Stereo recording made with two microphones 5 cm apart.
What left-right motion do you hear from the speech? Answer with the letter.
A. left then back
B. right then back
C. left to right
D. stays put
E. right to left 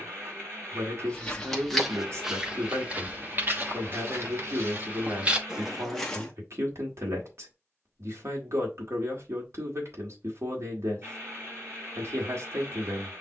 D.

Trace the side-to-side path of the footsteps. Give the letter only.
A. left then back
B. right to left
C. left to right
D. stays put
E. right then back
E.